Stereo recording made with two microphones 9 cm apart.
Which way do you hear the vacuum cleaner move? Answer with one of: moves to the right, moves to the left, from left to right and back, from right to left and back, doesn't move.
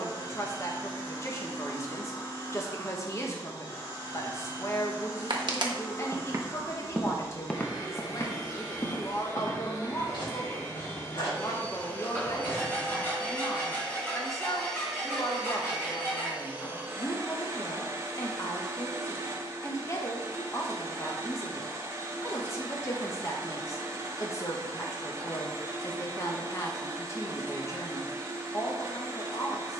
moves to the right.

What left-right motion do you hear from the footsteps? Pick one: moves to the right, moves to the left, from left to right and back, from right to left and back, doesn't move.
moves to the left.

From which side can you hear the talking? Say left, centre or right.
left.